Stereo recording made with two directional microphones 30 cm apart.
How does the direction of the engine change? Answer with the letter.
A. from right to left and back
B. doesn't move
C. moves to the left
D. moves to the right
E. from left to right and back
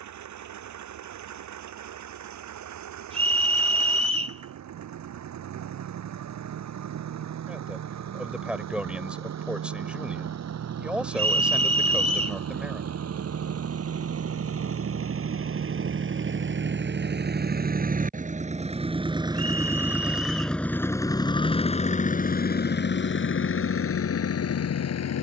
C.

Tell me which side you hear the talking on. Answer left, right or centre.
centre.